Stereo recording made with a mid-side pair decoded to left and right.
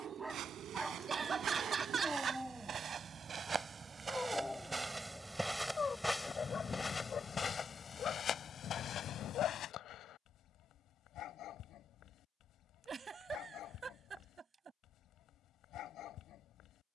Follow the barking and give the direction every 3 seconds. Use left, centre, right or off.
centre, centre, left, left, left, left.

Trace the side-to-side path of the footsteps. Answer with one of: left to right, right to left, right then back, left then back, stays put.
right to left.